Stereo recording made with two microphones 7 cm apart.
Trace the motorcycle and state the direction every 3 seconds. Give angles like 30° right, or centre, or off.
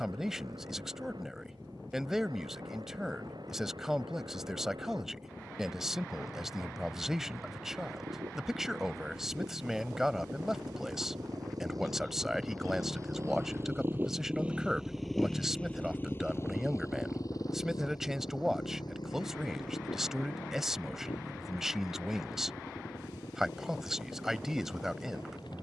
80° right, 70° right, 70° right, 60° right, 30° right, 40° left, 70° left, 80° left, 80° left.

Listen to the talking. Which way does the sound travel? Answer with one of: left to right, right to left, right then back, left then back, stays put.
stays put.